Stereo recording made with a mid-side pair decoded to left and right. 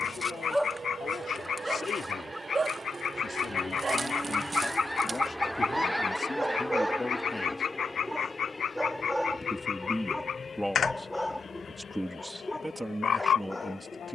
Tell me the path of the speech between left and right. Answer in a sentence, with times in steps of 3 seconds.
You can hear the speech on the left from 0 s and in the centre from 9 s.